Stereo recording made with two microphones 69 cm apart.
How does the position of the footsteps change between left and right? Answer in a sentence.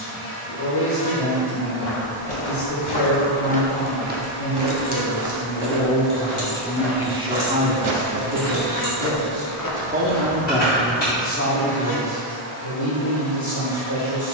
You can hear the footsteps go right and come back.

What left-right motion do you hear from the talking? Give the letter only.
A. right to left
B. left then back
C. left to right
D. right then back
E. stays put
D.